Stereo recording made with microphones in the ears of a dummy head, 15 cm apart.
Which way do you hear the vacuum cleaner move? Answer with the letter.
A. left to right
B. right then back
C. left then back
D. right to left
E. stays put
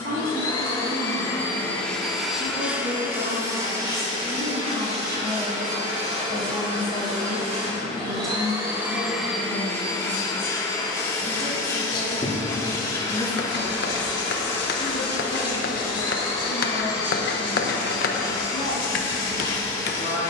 B.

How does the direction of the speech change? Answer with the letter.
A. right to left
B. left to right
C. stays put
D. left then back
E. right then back
A.